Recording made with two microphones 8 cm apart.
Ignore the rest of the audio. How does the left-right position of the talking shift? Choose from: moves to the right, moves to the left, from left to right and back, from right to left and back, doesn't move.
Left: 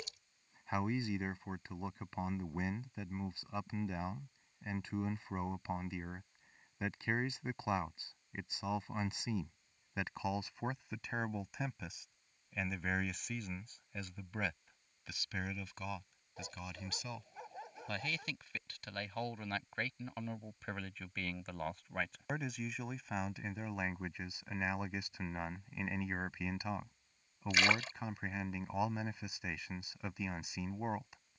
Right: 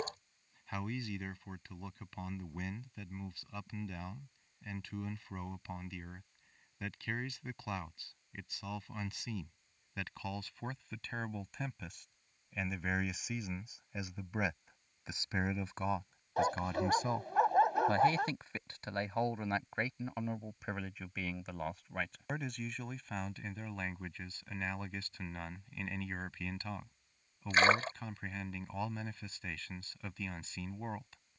from left to right and back.